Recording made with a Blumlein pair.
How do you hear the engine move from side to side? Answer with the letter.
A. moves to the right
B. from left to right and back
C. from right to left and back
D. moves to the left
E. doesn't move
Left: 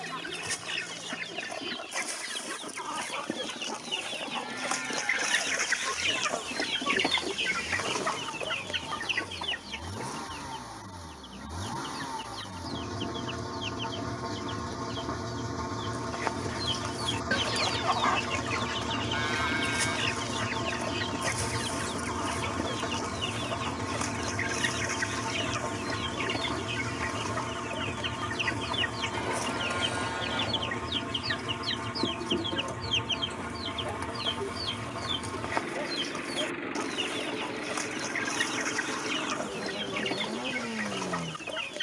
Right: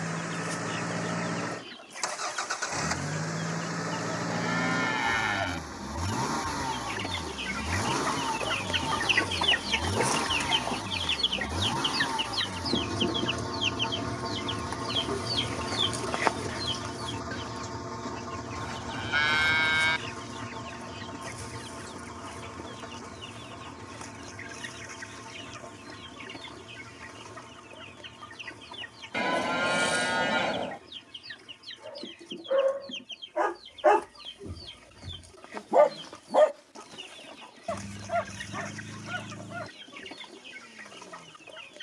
D.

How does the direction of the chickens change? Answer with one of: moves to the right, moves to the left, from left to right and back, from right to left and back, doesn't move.
from left to right and back.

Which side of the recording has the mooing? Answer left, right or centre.
right.